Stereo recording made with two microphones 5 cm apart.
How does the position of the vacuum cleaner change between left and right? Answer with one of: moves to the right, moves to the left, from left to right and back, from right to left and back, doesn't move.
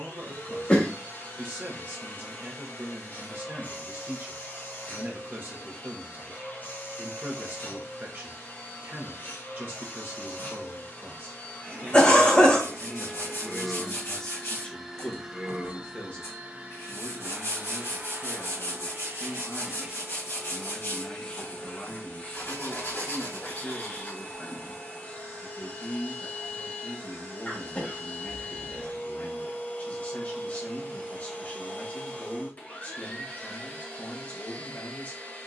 from left to right and back.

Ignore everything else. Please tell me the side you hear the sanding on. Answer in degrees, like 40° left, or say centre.
70° left.